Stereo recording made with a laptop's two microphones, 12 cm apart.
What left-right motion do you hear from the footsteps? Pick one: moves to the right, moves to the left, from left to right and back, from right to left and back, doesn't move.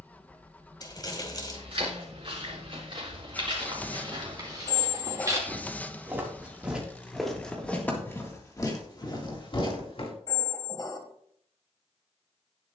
moves to the left.